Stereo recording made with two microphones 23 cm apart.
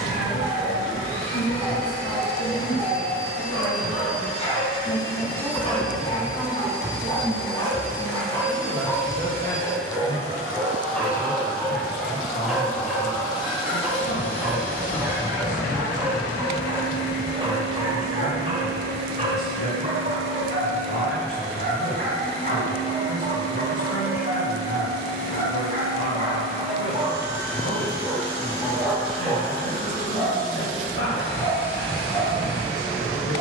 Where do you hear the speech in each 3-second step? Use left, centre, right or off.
left, left, centre, left, left, left, left, left, left, left, left.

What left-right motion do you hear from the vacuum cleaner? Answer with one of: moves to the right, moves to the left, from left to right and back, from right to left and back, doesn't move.
from left to right and back.